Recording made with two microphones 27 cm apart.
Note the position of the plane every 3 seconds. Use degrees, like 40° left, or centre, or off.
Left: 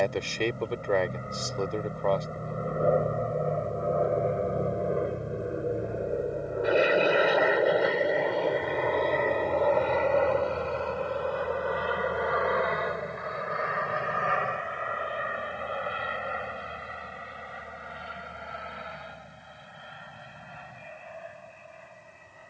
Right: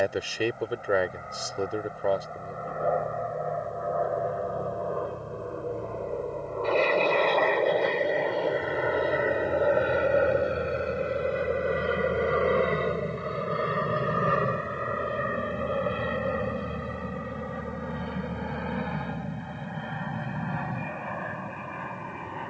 40° left, 30° left, 10° left, 20° right, 30° right, 50° right, 60° right, 60° right.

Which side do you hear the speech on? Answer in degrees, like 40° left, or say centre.
10° right.